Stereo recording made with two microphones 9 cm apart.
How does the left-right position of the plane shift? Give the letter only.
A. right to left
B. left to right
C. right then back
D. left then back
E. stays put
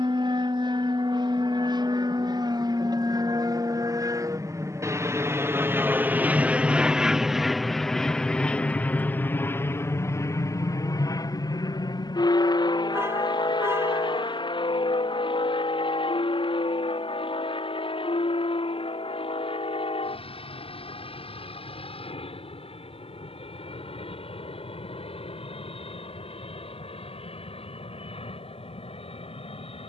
A.